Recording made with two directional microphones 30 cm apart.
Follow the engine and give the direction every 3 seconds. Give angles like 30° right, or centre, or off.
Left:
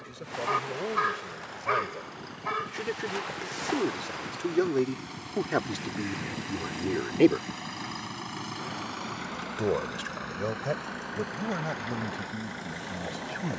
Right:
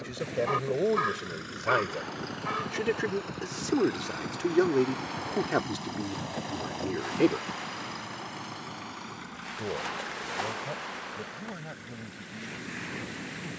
50° right, 30° right, 10° left, 50° left, 60° left.